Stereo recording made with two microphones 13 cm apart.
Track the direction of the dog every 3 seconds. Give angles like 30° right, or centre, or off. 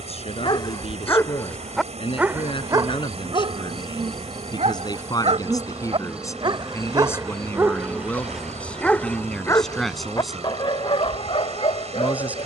10° left, 50° right, 20° right, 40° left.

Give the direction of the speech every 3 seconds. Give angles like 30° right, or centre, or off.
50° left, 30° left, 20° left, centre.